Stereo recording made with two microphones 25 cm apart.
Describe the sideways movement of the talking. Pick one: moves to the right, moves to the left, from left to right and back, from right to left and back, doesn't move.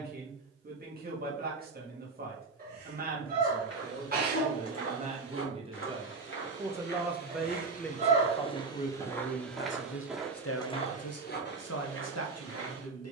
moves to the left.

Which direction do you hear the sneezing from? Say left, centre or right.
right.